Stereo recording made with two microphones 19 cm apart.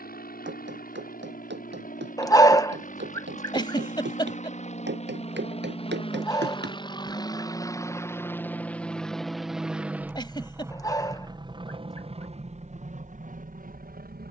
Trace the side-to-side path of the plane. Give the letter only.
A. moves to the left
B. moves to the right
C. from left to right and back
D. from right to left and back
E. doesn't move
B.